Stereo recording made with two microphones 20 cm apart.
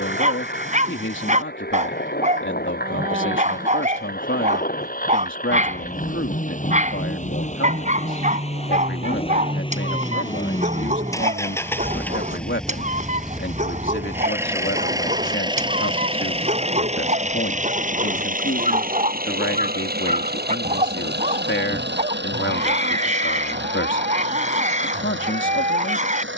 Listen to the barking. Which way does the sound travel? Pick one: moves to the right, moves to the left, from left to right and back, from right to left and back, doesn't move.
doesn't move.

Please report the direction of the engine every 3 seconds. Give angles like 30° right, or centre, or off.
50° left, 50° left, 40° left, 20° left, centre, 30° right, 50° right, 60° right, 70° right.